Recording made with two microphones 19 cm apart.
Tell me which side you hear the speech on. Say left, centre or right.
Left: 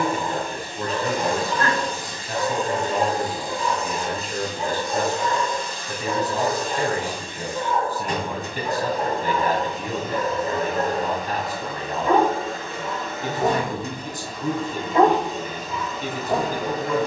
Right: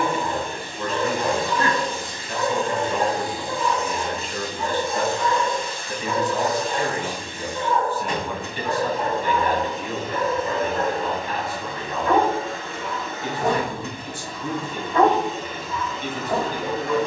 left.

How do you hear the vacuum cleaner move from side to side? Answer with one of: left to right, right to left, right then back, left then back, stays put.
stays put.